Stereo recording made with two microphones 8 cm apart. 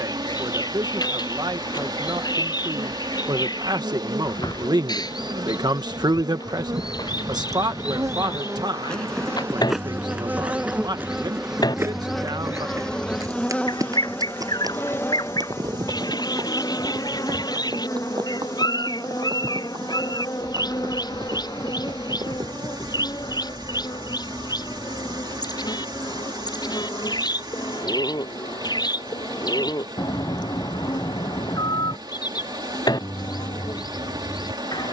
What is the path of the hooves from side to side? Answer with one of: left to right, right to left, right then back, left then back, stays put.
left to right.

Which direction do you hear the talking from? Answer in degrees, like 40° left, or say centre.
60° right.